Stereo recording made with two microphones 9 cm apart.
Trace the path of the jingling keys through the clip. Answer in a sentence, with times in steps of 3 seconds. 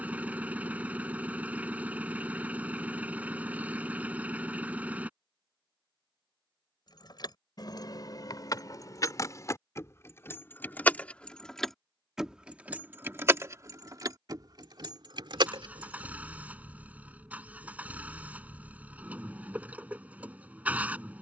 You can hear the jingling keys not at all from 0 s, on the left from 6 s, on the right from 12 s and not at all from 18 s.